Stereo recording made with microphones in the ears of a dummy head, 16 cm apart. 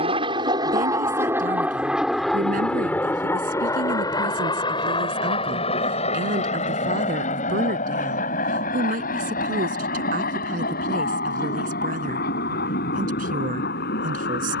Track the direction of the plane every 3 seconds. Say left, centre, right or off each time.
centre, left, left, left, left.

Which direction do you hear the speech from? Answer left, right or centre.
right.